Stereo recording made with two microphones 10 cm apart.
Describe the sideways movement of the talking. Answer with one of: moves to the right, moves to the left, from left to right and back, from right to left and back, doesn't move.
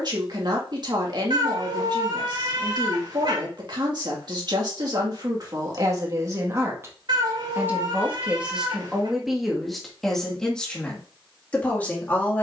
moves to the left.